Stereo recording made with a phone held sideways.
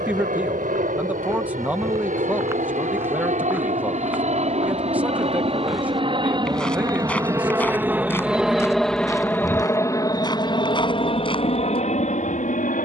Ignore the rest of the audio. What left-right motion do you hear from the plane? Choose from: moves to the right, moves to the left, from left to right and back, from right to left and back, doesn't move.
moves to the left.